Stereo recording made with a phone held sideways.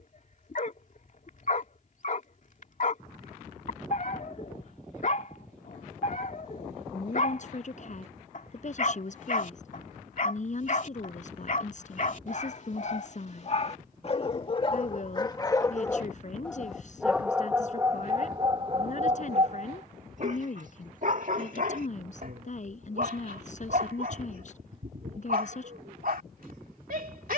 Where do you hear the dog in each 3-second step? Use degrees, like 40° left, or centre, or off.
60° left, 60° left, 60° left, 60° left, 50° left, 10° left, 40° right, 60° right, 70° right.